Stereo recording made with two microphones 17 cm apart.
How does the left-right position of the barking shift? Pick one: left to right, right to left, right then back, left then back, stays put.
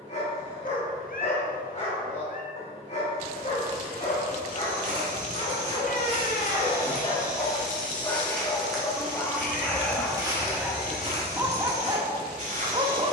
left to right.